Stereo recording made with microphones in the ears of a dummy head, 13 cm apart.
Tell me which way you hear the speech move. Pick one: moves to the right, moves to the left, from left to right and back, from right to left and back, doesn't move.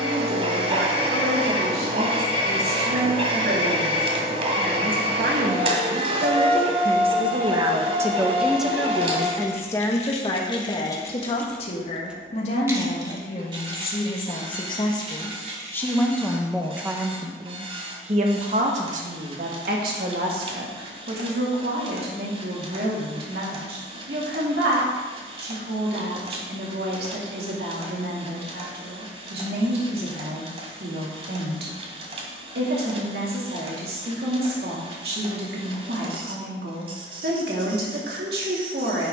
from right to left and back.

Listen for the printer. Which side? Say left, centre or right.
right.